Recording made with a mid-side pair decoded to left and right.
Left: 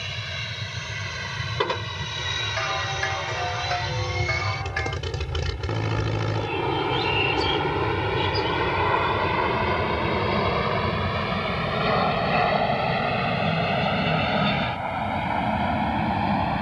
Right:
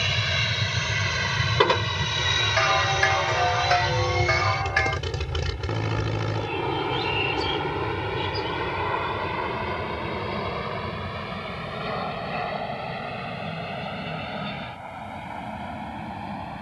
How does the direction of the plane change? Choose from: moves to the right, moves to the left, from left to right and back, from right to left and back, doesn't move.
moves to the left.